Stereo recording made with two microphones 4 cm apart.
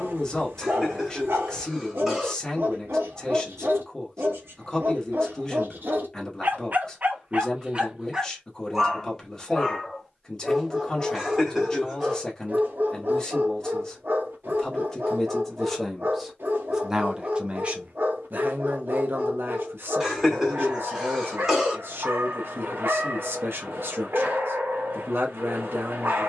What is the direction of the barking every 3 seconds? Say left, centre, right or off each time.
right, right, right, centre, right, right, right, right, right.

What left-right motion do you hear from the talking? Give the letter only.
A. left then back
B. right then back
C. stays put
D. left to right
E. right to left
D.